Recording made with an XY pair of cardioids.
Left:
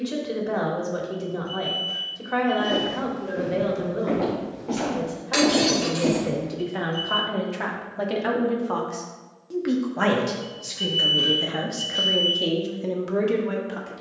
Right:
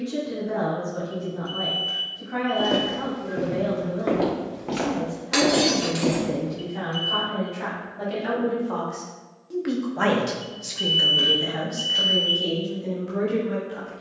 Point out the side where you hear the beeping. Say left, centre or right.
right.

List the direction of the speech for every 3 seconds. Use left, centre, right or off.
left, left, left, centre, left.